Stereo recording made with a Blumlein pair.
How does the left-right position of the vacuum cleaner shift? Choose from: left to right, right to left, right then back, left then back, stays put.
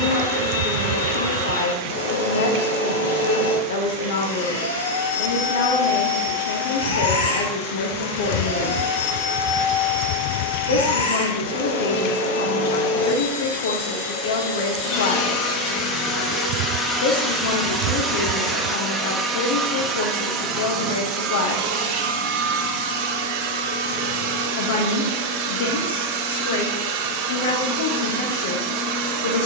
left to right.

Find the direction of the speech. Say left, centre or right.
left.